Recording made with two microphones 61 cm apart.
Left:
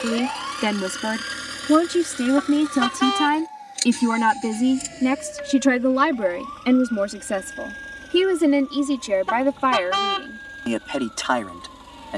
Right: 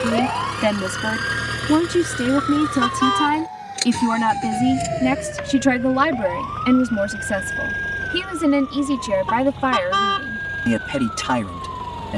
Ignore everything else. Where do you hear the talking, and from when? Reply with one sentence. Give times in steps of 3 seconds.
You can hear the talking in the centre from 0 s and on the right from 6 s.